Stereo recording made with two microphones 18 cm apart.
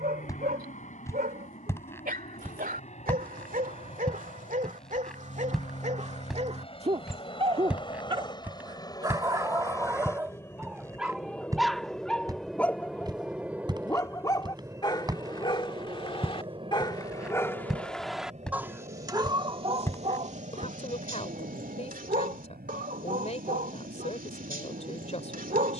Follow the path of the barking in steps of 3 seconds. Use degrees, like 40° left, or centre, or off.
60° right, 50° right, 30° right, 10° right, 20° left, 20° left, 30° right, 60° right, 60° right.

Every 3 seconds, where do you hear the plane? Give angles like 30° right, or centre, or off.
50° left, 40° left, 30° left, 20° left, 10° right, 30° right, 50° right, 60° right, 60° right.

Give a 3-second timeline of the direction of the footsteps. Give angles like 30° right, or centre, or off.
20° left, 10° left, 10° right, 20° right, 20° right, 10° right, 10° left, off, off.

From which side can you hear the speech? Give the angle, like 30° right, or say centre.
40° left.